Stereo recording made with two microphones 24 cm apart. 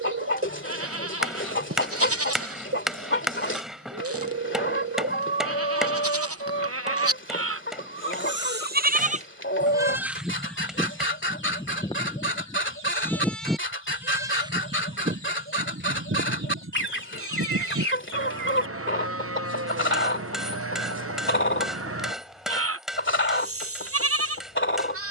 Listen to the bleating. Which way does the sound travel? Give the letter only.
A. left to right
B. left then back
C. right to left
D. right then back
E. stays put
B.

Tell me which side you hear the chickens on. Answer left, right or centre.
left.